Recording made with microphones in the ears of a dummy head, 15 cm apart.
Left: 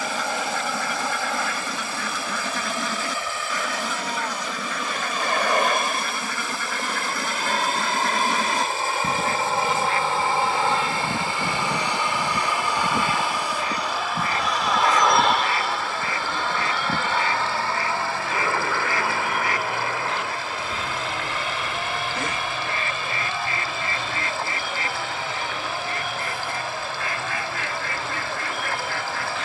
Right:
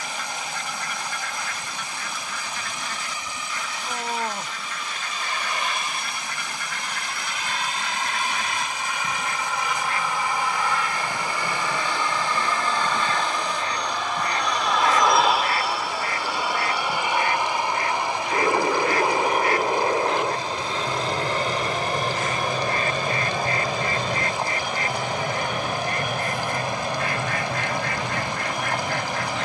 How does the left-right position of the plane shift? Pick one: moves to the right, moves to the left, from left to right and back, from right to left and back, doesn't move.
moves to the right.